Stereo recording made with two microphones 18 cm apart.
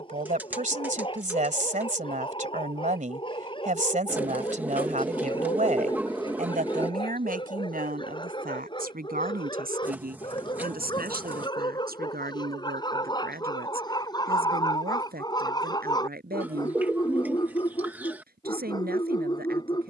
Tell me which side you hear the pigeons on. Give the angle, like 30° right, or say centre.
10° right.